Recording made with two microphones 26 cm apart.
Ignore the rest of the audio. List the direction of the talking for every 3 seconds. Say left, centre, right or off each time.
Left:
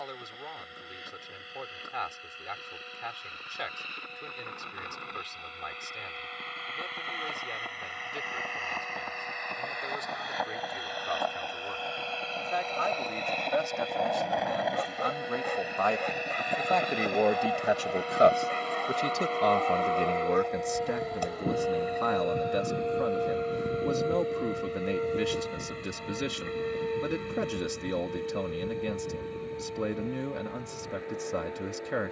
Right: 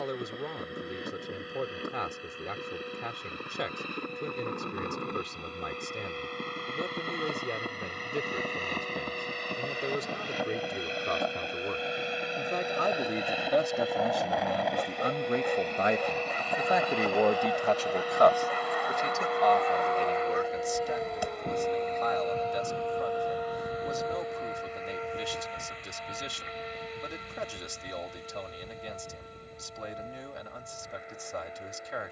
right, right, right, right, right, centre, left, left, left, left, left.